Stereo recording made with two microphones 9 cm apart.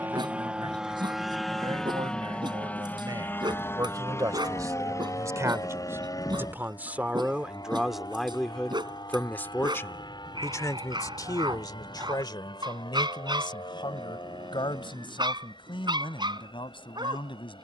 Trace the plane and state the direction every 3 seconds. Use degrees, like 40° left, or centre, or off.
centre, 30° left, 40° left, 50° left, 50° left, 60° left.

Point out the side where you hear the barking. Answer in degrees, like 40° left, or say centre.
60° right.